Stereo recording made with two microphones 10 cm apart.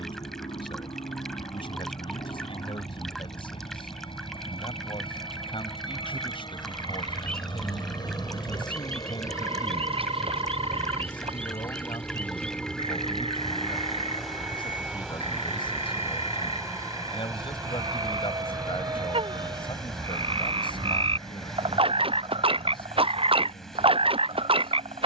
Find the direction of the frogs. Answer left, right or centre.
right.